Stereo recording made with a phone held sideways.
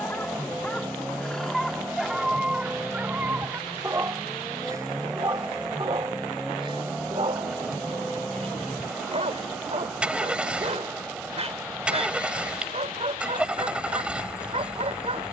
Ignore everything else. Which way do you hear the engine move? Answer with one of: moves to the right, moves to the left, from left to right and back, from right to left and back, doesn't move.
doesn't move.